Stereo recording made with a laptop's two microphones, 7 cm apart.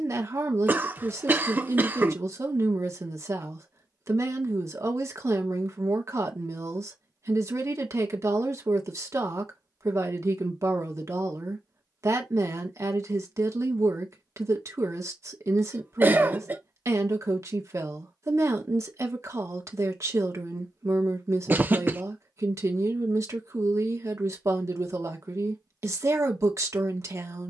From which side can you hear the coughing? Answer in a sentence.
In this clip you hear the coughing on the right.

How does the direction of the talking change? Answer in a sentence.
You can hear the talking stay put.